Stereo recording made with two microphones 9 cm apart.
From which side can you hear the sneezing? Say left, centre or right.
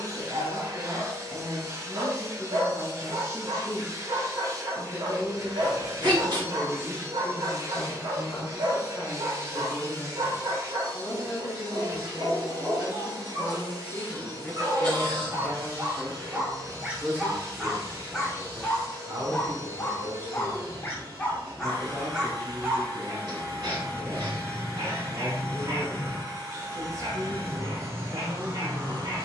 right.